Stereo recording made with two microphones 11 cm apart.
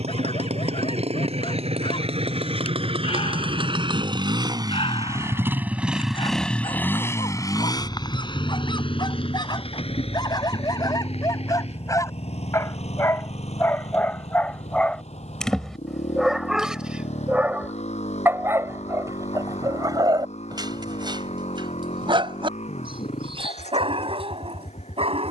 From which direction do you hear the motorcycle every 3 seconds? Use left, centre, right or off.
right, right, left, left, left, left, left, left, left.